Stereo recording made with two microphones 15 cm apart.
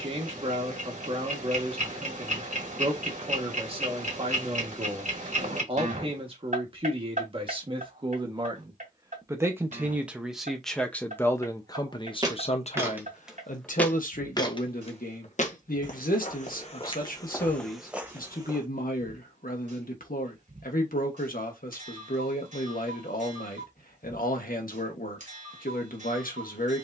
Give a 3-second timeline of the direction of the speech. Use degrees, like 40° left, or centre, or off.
40° right, 40° right, 30° right, centre, 60° left, 70° left, 70° left, 70° left, 70° left.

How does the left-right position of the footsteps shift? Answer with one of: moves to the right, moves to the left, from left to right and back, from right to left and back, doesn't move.
from right to left and back.